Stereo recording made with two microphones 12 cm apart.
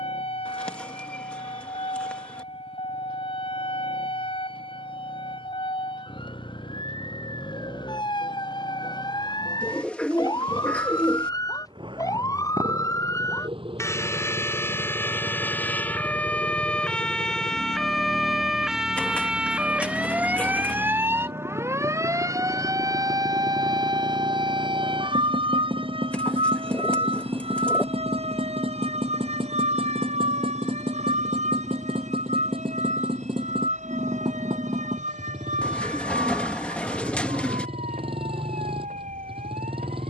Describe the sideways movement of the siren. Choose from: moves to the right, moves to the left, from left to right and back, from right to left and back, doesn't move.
moves to the right.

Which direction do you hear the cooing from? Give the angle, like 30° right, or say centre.
10° left.